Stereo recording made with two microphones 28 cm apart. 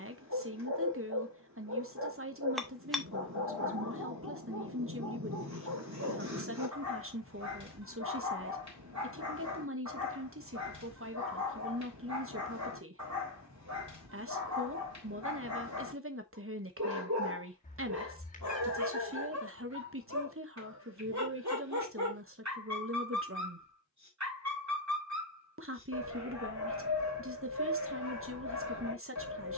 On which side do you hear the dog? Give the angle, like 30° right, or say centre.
70° right.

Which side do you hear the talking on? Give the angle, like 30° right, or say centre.
50° right.